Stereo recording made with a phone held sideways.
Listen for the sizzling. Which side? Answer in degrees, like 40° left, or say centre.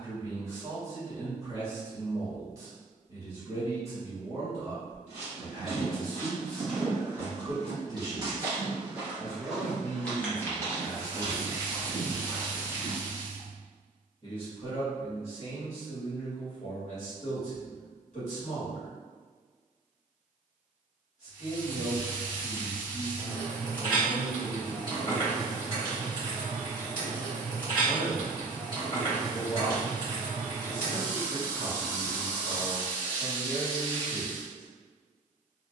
30° left.